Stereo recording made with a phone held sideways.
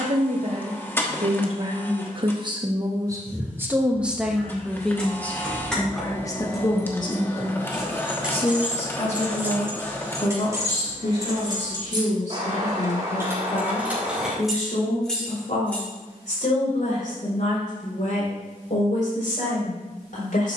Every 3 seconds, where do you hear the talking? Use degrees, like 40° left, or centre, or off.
40° right, centre, 30° left, 50° left, 60° left, 60° left, 70° left.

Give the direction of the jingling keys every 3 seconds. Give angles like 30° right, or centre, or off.
off, 10° left, centre, 20° right, 20° right, 10° left, off.